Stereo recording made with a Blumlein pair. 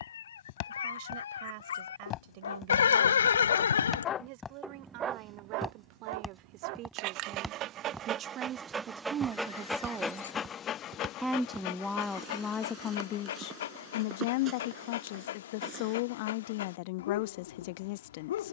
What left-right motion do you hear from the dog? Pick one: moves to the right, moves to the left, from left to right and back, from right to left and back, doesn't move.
from left to right and back.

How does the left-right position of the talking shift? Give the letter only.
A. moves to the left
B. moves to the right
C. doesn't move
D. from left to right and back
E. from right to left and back
A.